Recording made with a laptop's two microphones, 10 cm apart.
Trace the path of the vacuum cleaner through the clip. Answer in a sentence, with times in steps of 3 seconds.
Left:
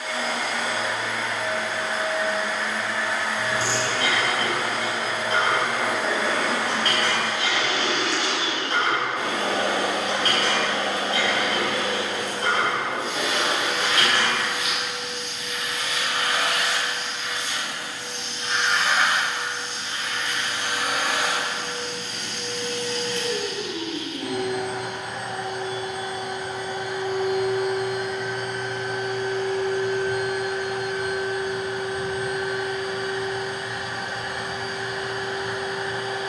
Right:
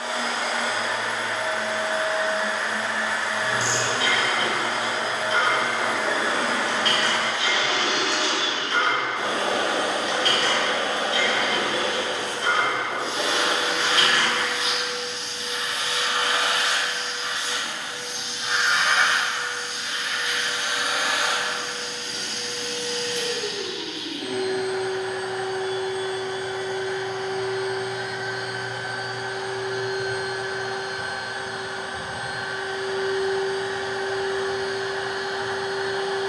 You can hear the vacuum cleaner on the right from 0 s, on the left from 18 s, in the centre from 27 s and on the right from 30 s.